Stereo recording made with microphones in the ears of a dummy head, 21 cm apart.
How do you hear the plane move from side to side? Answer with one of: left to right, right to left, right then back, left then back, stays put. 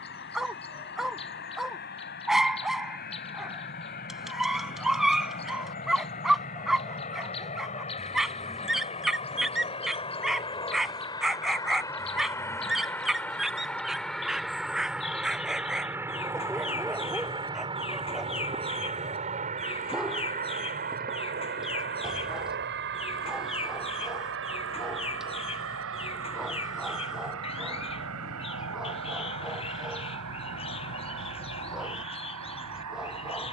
left to right.